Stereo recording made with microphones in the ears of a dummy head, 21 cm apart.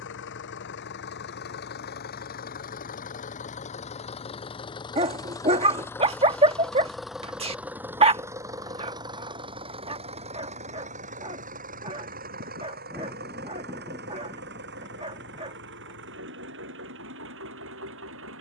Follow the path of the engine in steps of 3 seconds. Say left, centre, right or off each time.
left, left, centre, right, right, right.